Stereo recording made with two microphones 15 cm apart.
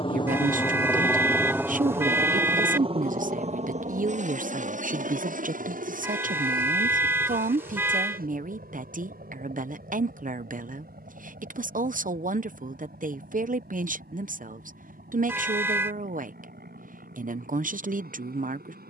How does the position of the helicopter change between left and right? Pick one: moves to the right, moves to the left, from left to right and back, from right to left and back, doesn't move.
moves to the right.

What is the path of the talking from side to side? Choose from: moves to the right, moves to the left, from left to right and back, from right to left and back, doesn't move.
doesn't move.